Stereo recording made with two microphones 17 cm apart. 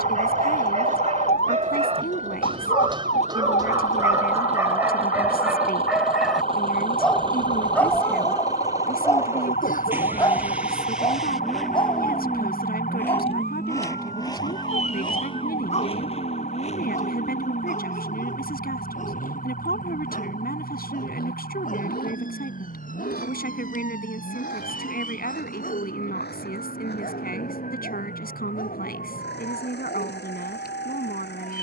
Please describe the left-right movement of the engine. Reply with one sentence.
You can hear the engine go from the right side to the left.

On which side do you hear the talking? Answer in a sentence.
You can hear the talking on the left.